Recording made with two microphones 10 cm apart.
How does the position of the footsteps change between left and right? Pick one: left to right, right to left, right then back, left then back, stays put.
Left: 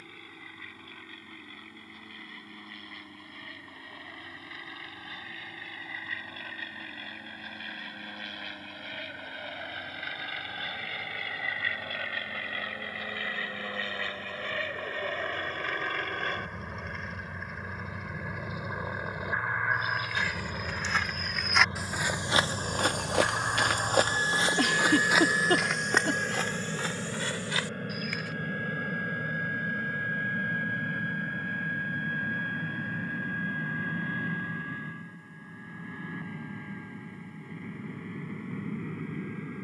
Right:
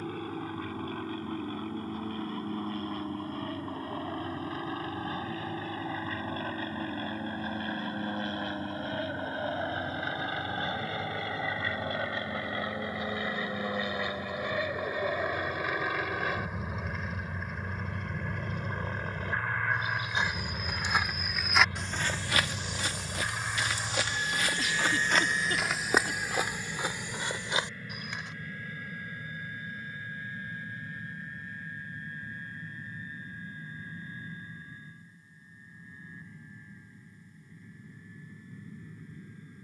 left then back.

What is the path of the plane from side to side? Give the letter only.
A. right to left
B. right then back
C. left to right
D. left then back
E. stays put
A.